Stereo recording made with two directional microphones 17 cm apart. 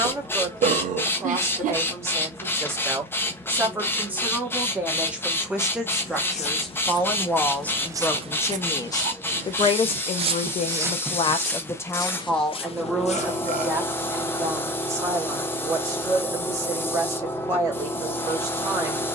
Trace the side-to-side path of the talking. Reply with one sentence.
You can hear the talking move from right to left and back again.